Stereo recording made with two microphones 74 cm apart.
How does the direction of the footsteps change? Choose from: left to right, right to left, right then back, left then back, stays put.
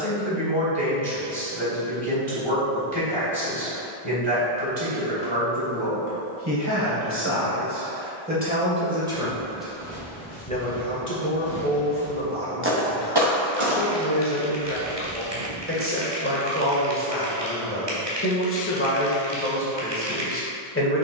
left to right.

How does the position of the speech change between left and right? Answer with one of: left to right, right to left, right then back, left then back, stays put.
right to left.